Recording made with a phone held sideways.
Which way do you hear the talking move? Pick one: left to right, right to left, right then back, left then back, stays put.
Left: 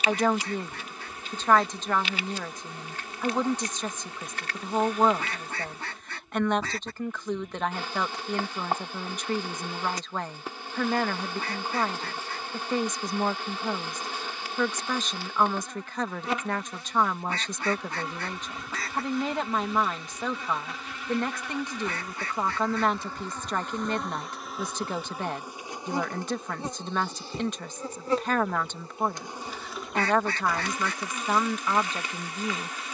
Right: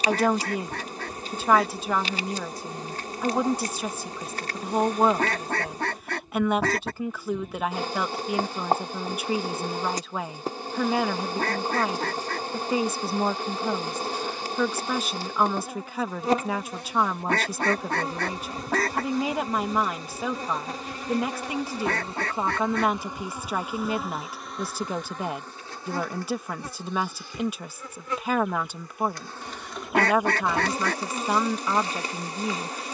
stays put.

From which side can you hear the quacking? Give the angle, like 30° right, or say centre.
70° right.